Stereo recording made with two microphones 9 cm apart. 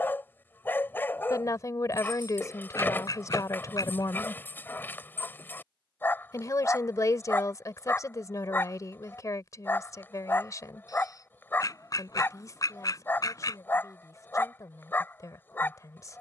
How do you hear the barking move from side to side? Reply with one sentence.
You can hear the barking stay in one place.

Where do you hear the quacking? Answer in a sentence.
In this clip you hear the quacking on the left.